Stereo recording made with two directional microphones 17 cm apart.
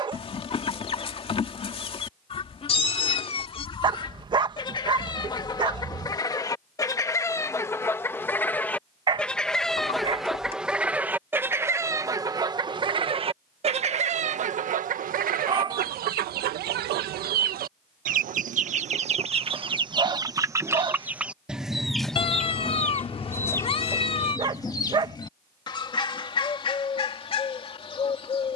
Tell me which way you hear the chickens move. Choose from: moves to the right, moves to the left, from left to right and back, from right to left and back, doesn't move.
from left to right and back.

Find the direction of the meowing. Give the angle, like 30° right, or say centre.
30° left.